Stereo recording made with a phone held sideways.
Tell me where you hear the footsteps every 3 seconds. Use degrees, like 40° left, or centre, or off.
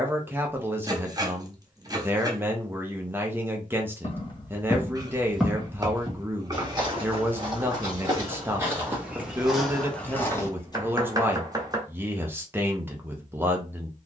off, 10° left, 20° right, centre, off.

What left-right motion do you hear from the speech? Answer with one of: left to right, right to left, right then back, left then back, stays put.
stays put.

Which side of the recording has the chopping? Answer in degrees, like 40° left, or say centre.
30° right.